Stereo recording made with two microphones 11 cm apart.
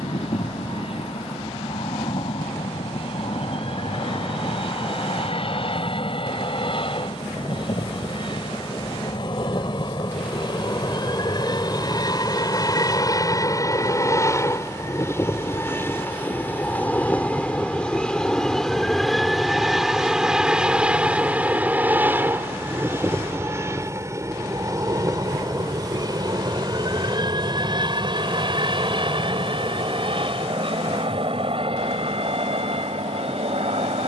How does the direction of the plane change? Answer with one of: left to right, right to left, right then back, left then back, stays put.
left to right.